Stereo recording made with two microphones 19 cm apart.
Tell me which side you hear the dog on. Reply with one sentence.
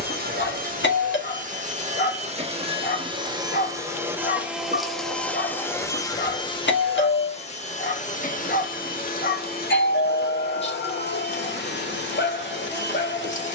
In this clip you hear the dog on the left.